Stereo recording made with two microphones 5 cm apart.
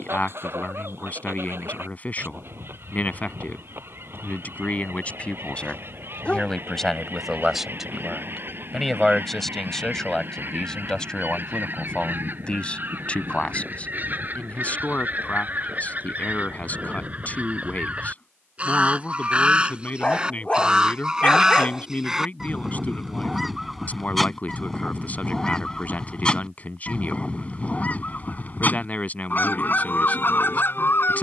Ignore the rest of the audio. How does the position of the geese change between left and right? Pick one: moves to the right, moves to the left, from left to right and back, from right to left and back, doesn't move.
moves to the left.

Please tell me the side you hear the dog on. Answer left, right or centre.
left.